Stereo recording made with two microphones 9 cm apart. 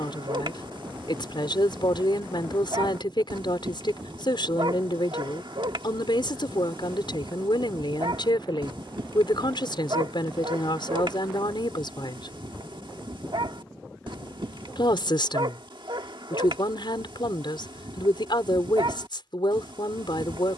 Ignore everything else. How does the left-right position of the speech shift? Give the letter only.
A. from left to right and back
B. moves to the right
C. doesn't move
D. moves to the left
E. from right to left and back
C.